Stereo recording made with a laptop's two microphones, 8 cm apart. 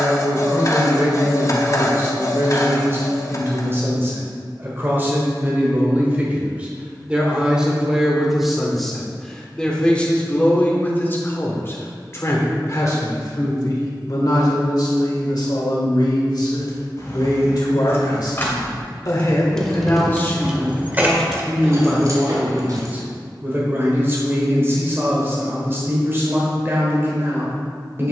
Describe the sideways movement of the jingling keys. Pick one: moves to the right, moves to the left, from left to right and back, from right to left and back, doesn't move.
moves to the right.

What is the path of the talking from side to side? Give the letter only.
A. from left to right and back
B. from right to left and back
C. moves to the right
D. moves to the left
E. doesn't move
B.